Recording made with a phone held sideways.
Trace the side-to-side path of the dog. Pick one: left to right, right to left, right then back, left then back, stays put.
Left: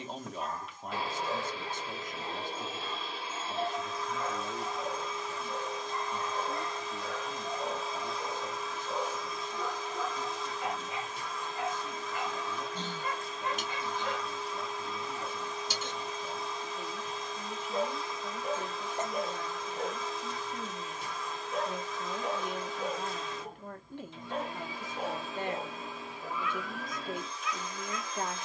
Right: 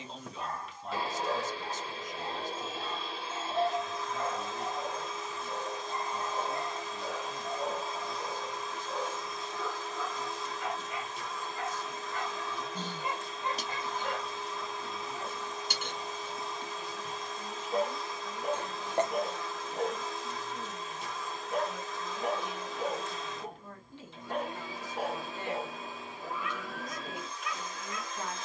left then back.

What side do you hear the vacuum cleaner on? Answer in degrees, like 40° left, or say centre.
centre.